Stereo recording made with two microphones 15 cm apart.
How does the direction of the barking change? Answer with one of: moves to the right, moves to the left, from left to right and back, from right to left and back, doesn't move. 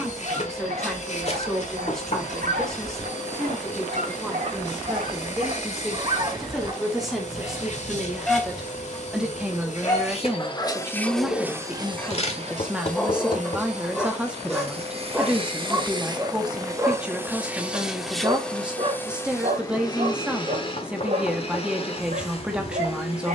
from right to left and back.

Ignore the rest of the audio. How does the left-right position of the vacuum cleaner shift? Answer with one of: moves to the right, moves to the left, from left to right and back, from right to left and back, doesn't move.
from left to right and back.